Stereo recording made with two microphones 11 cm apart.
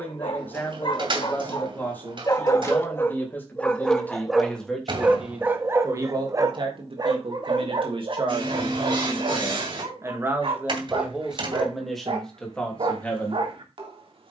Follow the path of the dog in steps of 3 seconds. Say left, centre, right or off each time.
left, centre, right, right, right.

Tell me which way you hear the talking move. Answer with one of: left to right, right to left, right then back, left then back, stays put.
right then back.